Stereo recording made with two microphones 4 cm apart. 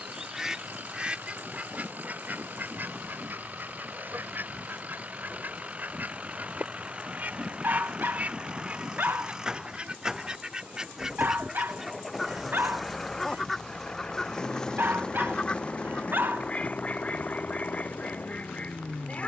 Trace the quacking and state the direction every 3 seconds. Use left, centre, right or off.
right, right, right, right, centre, left, left.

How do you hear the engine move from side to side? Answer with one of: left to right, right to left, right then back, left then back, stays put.
right to left.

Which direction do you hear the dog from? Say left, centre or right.
right.